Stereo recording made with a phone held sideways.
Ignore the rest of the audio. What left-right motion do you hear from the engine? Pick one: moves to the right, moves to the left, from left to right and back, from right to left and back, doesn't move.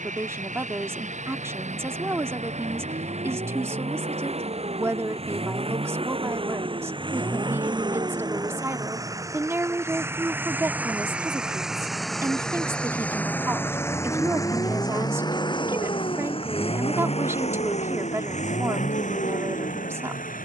moves to the left.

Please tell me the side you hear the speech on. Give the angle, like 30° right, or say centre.
20° right.